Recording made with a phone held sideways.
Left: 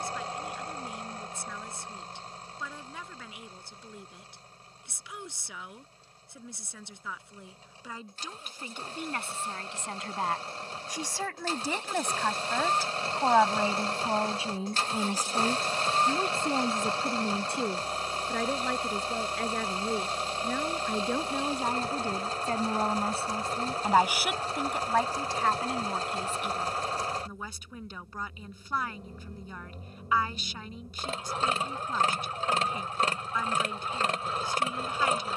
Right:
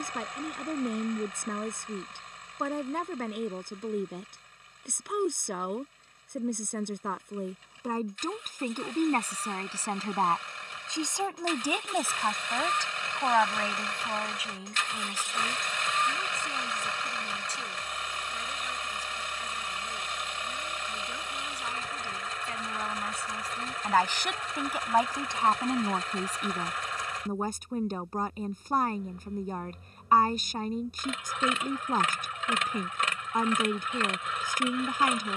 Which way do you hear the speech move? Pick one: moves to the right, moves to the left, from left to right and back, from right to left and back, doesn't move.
from right to left and back.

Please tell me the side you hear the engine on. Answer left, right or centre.
left.